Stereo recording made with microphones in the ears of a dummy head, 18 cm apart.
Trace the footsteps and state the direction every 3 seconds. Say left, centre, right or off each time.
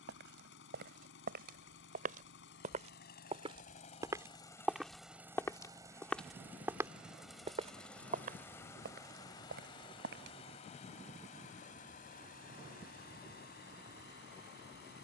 right, centre, right, right, off.